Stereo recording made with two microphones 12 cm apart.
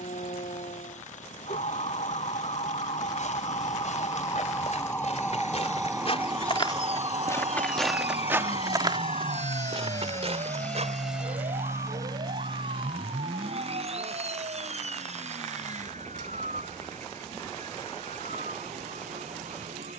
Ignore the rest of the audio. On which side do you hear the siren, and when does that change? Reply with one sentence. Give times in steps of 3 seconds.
In this clip you hear the siren on the left from 0 s and on the right from 6 s.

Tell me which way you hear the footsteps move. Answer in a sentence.
You can hear the footsteps move from left to right.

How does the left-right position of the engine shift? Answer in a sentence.
In this clip you hear the engine go from the left side to the right.